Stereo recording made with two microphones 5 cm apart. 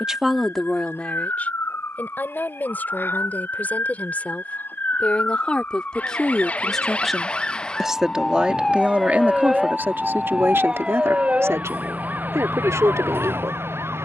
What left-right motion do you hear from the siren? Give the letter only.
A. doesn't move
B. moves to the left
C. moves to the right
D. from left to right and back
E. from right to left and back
C.